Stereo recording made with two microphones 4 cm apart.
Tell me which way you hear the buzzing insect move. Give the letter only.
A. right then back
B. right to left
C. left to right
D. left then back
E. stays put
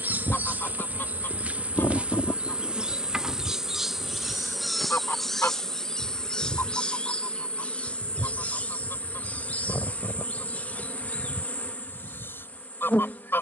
B.